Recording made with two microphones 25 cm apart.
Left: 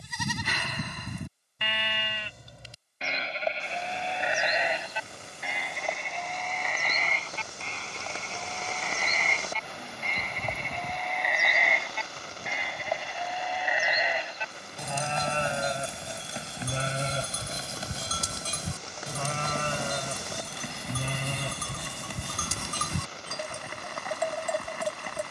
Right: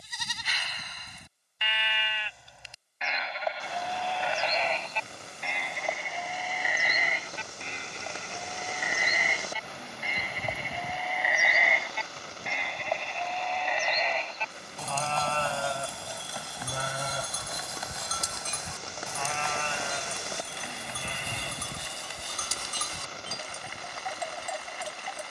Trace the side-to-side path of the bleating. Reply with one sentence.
You can hear the bleating move from left to right and back again.